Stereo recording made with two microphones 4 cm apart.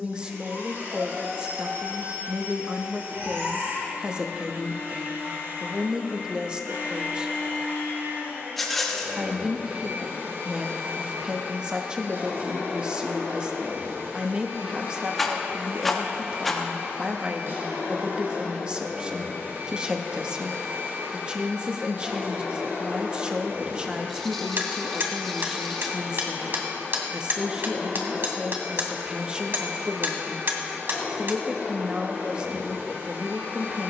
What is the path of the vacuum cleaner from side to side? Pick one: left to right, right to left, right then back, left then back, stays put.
stays put.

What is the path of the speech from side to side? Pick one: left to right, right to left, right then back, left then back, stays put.
stays put.